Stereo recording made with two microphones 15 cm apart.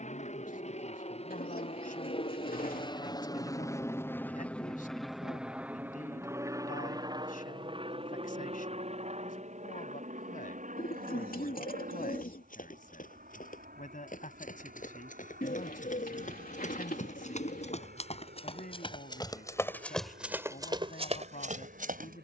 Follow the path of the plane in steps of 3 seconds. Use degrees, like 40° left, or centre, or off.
50° left, 10° left, 30° right, 50° right, 60° right, 70° right, 70° right, 70° right.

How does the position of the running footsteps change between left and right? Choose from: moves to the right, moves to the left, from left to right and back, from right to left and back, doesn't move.
moves to the right.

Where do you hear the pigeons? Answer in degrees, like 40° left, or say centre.
70° left.